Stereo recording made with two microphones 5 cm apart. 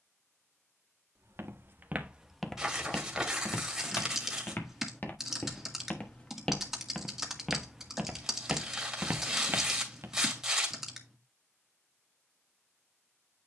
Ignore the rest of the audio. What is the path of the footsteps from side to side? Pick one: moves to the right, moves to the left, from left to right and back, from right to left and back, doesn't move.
from right to left and back.